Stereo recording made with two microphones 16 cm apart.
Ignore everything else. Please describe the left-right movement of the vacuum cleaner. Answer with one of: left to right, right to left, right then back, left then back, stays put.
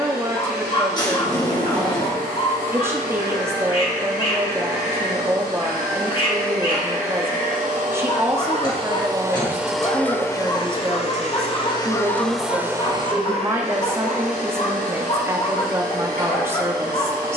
left then back.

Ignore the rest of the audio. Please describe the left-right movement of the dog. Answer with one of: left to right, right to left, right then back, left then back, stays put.
stays put.